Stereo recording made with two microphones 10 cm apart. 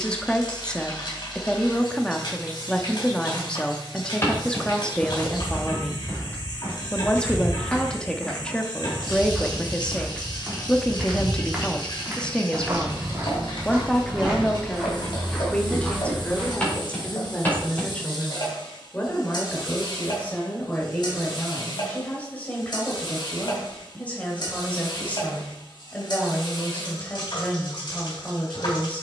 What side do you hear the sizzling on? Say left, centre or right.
left.